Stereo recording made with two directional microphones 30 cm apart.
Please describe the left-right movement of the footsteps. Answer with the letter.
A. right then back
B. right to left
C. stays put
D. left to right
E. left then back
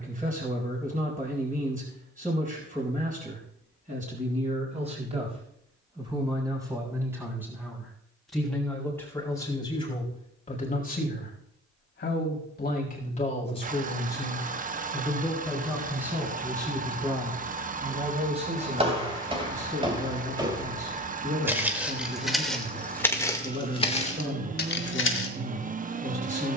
B.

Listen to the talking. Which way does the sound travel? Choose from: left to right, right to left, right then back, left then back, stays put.
left then back.